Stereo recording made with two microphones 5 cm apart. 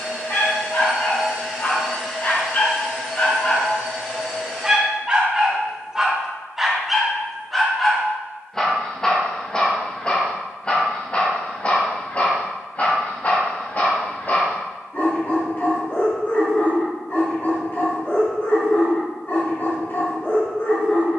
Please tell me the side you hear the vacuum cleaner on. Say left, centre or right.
centre.